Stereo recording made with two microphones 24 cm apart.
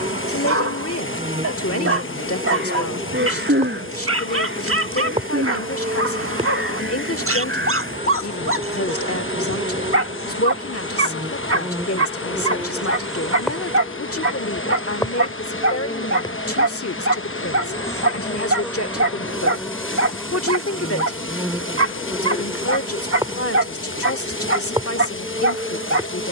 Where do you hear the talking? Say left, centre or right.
left.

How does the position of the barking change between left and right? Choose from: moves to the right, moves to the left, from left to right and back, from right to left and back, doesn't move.
doesn't move.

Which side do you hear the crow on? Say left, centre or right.
right.